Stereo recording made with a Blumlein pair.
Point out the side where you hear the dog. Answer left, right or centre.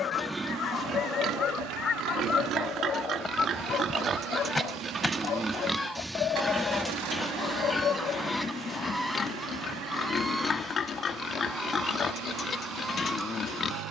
left.